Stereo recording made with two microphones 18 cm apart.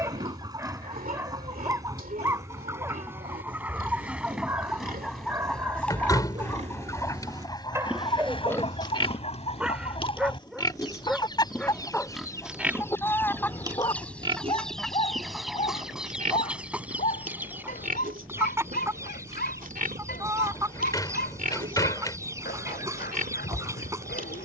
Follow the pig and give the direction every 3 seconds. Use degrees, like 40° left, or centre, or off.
50° right, 50° right, 20° right, 20° left, 20° right, 40° right, 50° right, 50° right.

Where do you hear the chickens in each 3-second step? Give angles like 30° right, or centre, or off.
20° right, centre, 20° left, 30° left, 10° left, 10° right, 20° right, 20° right.